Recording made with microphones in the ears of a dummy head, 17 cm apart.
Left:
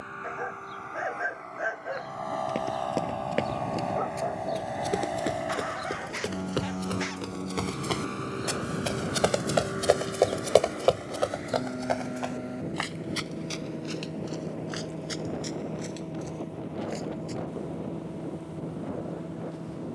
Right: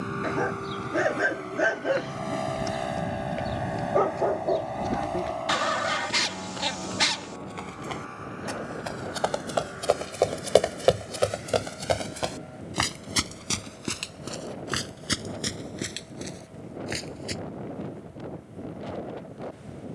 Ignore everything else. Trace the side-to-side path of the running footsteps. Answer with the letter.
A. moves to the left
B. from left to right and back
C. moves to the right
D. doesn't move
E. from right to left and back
C.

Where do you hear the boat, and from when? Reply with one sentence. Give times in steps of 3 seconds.
You can hear the boat on the right from 0 s, in the centre from 3 s and on the left from 6 s.